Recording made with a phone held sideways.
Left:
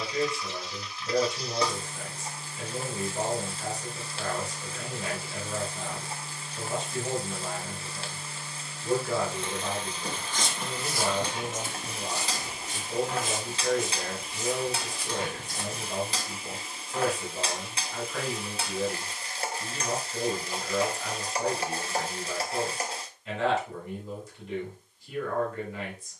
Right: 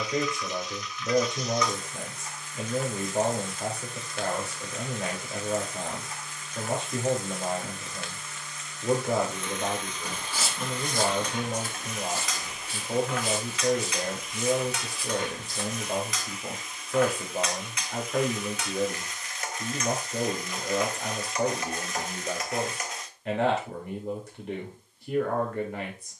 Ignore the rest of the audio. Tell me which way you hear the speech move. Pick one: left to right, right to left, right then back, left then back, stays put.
stays put.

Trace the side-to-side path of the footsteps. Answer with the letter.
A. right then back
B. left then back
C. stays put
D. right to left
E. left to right
D.